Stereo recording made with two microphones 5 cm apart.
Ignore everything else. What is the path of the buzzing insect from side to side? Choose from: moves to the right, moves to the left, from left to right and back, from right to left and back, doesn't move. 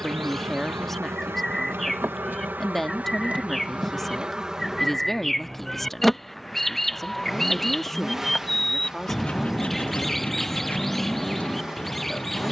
moves to the left.